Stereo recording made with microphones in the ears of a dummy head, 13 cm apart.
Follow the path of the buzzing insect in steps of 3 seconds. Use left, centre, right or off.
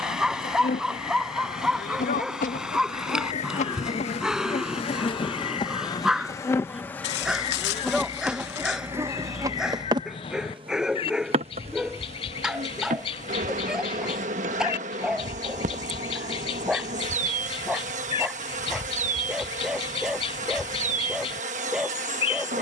left, left, centre, right, right, right, right, right.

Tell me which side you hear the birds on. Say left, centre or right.
left.